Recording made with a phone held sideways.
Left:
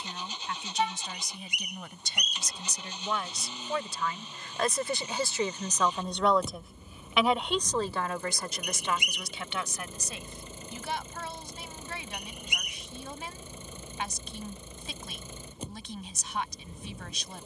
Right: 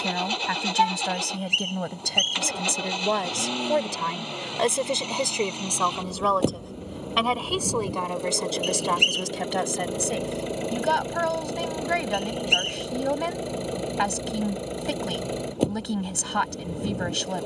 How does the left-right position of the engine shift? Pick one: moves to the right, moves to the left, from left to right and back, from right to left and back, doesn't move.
doesn't move.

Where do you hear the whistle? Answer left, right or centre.
right.